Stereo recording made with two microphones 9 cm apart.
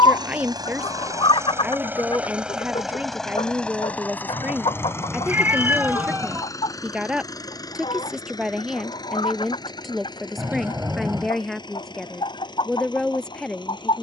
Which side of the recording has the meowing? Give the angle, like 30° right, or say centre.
20° right.